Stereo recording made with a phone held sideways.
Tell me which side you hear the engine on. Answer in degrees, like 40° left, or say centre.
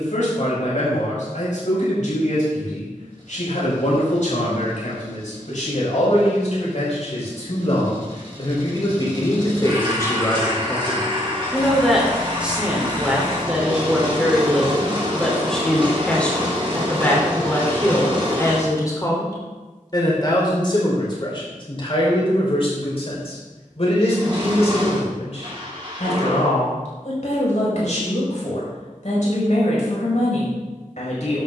40° right.